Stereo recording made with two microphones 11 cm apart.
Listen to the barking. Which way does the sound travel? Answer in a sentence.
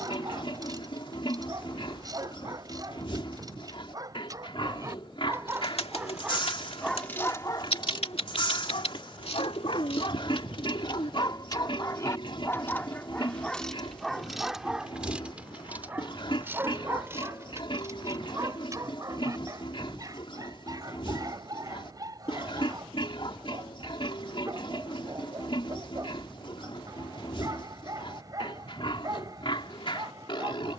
In this clip you hear the barking go left and come back.